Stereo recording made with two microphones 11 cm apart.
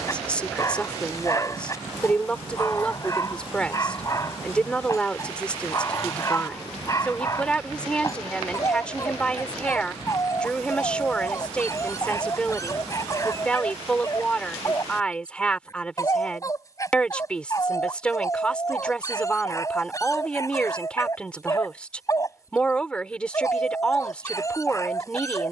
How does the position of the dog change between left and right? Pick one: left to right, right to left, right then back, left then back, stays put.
stays put.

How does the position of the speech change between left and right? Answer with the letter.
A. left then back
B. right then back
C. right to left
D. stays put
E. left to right
D.